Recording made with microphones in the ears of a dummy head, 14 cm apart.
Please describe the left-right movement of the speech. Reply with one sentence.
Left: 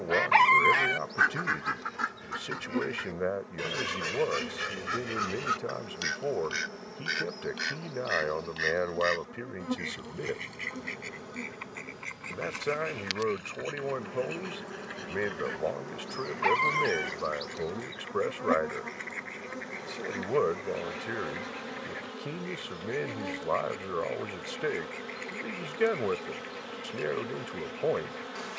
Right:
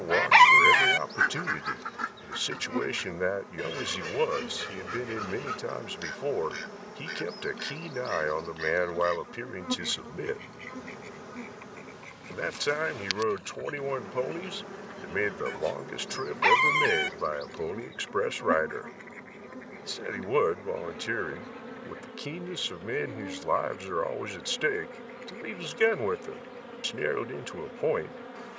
You can hear the speech stay put.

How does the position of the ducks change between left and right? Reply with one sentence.
In this clip you hear the ducks go from the right side to the left.